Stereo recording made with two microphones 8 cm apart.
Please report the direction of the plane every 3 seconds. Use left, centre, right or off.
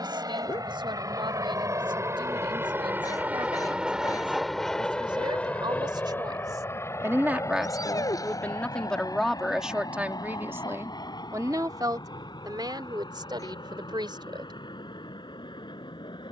right, centre, left, left, left, left.